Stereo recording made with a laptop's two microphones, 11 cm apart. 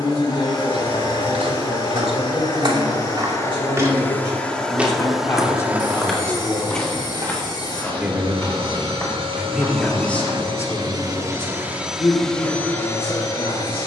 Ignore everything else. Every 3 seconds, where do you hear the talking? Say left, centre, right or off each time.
left, left, centre, left, left.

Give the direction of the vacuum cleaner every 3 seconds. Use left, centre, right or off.
left, centre, right, right, left.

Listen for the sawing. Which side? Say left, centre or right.
left.